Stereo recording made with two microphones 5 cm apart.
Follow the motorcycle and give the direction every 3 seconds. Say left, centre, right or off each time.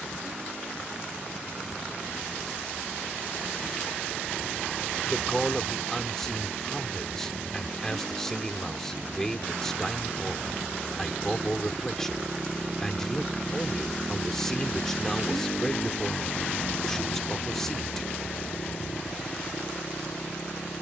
right, right, right, right, centre, left, left.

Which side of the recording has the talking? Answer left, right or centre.
centre.